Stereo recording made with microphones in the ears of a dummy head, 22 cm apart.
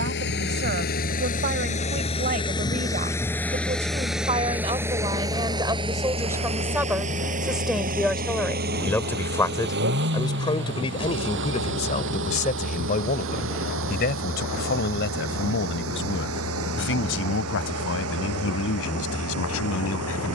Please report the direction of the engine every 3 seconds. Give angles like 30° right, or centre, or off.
30° left, 10° right, 30° right, 50° right, 50° right, 60° right, 60° right.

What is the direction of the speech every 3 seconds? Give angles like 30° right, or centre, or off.
40° right, 20° right, centre, 20° left, 40° left, 50° left, 60° left.